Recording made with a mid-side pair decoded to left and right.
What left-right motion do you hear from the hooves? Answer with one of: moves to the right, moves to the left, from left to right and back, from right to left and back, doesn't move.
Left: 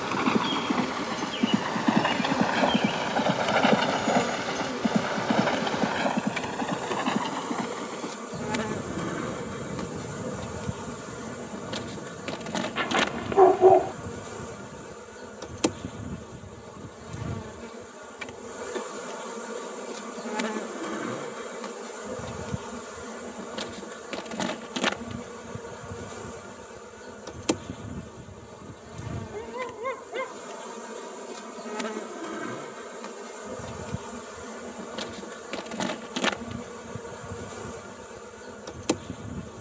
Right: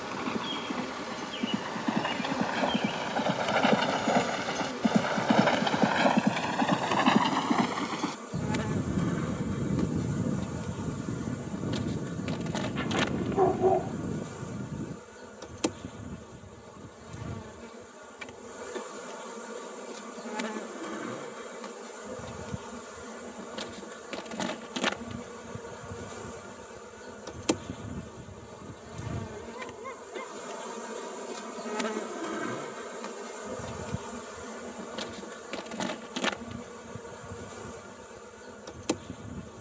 moves to the right.